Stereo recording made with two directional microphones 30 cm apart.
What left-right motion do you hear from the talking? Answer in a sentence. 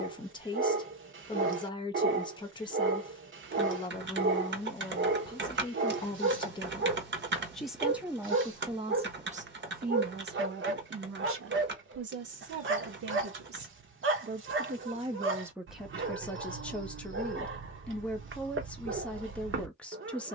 You can hear the talking go right and come back.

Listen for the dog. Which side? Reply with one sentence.
In this clip you hear the dog on the right.